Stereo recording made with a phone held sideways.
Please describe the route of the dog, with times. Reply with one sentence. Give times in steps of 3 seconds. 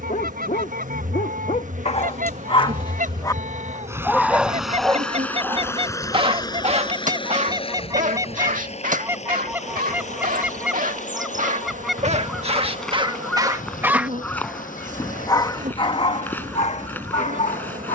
In this clip you hear the dog on the left from 0 s, in the centre from 3 s, on the right from 6 s and on the left from 15 s.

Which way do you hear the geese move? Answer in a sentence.
You can hear the geese go from the right side to the left.